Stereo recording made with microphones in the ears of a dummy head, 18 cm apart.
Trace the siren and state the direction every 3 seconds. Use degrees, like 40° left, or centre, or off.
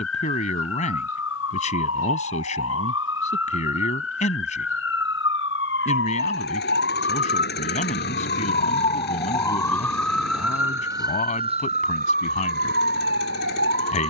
70° left, 60° left, 50° left, 10° right, 50° right.